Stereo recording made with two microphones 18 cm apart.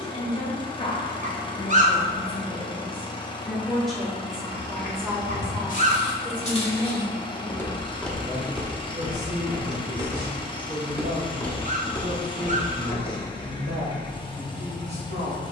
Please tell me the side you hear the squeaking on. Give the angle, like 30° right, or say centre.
40° right.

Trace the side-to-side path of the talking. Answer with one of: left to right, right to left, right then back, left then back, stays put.
left to right.